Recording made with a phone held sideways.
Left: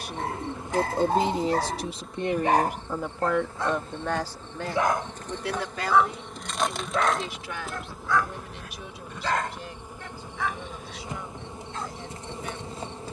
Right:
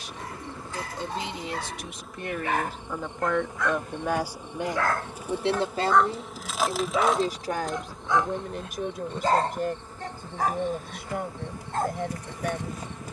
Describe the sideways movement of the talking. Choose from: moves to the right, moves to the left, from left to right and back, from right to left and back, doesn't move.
moves to the right.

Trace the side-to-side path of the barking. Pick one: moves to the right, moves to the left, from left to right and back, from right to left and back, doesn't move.
moves to the right.